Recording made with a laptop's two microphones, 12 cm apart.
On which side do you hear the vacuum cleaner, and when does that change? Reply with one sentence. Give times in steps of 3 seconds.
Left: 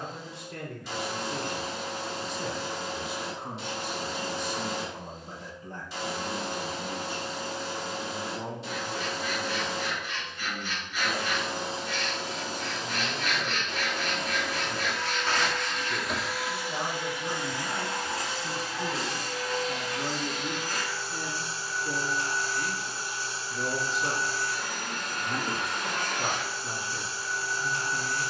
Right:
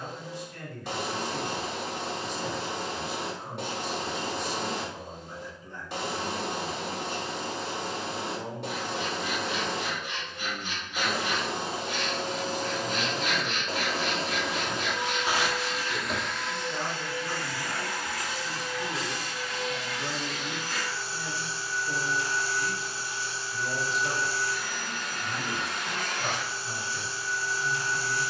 You can hear the vacuum cleaner on the right from 0 s, in the centre from 15 s and on the left from 18 s.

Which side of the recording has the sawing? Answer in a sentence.
In this clip you hear the sawing on the right.